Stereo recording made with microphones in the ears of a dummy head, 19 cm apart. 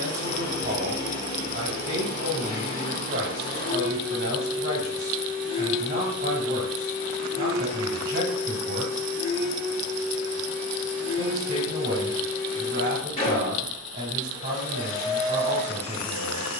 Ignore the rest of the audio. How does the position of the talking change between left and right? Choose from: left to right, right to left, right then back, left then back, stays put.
stays put.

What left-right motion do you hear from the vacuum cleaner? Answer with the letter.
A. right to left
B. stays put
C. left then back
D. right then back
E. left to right
B.